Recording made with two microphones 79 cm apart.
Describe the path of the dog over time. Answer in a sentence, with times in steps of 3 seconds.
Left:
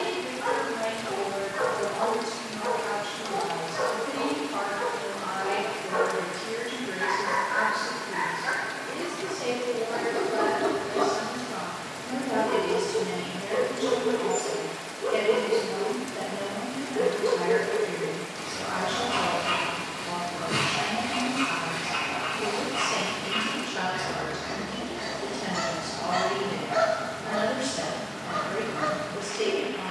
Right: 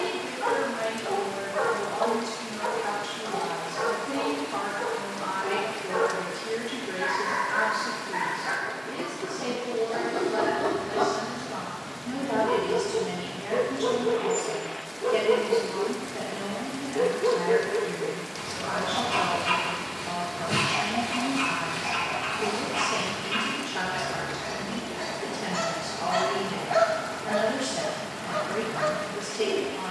In this clip you hear the dog on the right from 0 s, on the left from 3 s, in the centre from 9 s and on the right from 12 s.